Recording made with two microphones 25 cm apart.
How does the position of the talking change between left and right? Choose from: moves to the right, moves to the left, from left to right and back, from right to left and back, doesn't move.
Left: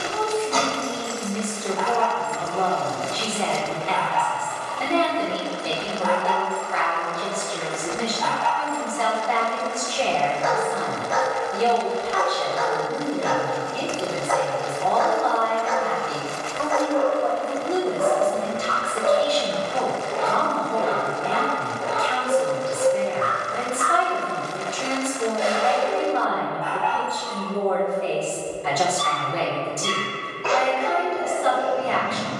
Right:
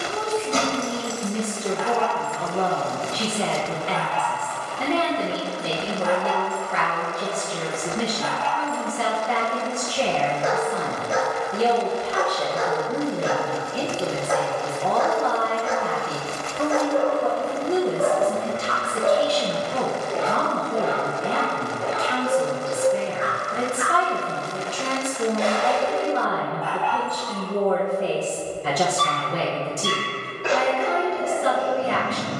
doesn't move.